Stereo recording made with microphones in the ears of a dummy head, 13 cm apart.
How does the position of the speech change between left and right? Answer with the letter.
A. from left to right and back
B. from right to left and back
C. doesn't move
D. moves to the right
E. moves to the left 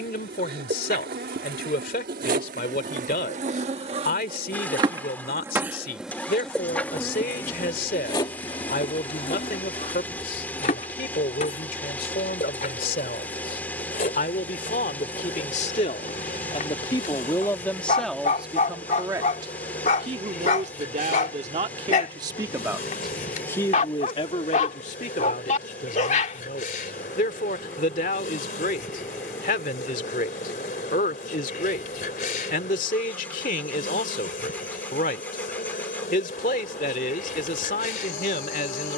A.